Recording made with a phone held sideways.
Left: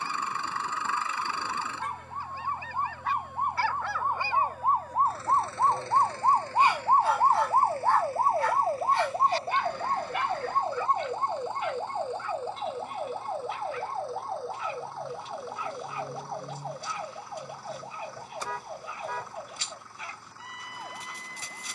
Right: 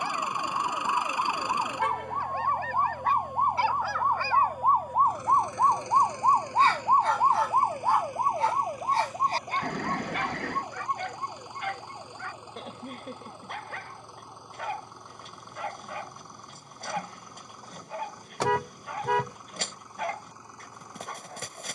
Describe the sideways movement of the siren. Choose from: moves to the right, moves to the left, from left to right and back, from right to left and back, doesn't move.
moves to the left.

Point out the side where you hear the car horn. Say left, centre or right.
right.